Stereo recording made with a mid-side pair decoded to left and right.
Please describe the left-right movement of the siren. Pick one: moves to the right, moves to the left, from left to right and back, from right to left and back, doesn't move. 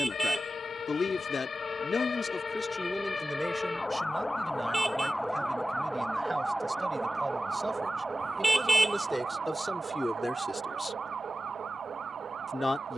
moves to the right.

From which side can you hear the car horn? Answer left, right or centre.
centre.